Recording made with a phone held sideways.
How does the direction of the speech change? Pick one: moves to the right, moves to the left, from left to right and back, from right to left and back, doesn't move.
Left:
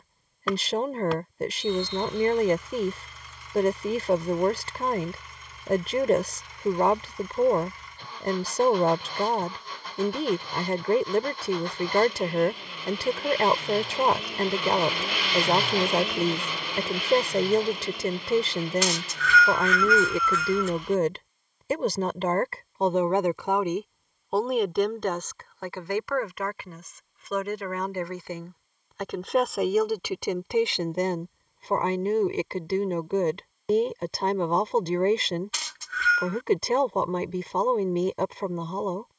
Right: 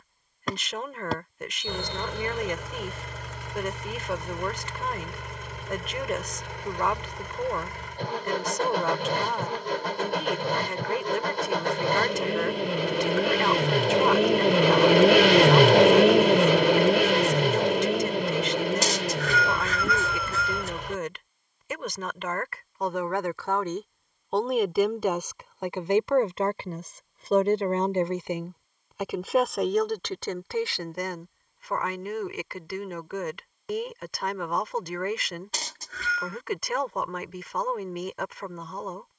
from left to right and back.